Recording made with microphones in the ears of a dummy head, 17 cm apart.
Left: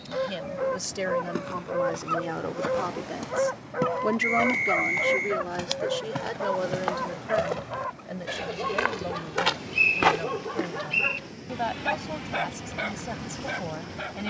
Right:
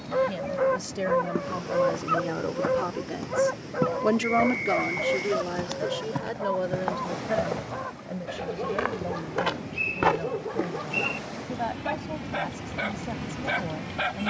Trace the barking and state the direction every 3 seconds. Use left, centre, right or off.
centre, left, left, left, centre.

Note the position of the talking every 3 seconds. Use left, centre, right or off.
left, centre, left, left, left.